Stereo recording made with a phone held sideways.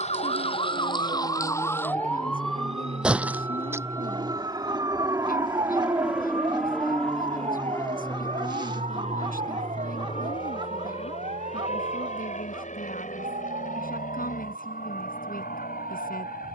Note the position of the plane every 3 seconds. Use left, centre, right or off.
right, right, centre, left, left, left.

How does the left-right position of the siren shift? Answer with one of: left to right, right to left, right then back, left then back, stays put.
left to right.